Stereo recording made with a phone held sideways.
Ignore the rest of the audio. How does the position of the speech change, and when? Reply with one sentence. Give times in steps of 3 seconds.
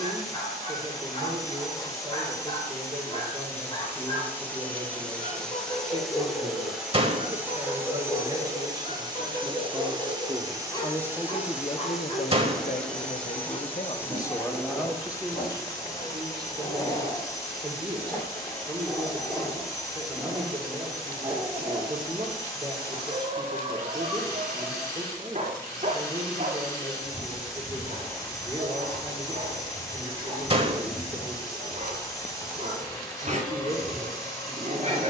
In this clip you hear the speech on the right from 0 s, in the centre from 9 s, on the left from 12 s and on the right from 15 s.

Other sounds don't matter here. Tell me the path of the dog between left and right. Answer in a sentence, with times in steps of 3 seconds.
In this clip you hear the dog on the left from 0 s, in the centre from 18 s and on the right from 21 s.